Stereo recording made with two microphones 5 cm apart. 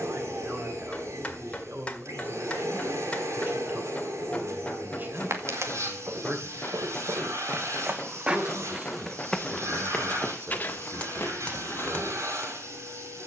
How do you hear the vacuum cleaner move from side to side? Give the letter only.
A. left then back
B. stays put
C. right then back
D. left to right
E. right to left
B.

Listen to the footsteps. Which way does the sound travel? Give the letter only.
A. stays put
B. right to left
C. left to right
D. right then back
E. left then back
B.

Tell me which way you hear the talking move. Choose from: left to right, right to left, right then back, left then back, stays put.
stays put.